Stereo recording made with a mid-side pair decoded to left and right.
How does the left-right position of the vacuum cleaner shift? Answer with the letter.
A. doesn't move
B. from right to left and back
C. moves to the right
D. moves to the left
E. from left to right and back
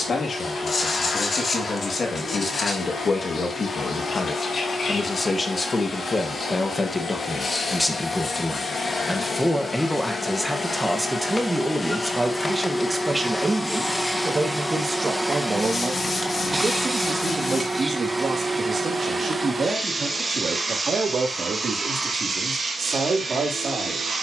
C.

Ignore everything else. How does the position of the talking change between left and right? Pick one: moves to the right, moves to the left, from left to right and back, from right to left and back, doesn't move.
moves to the right.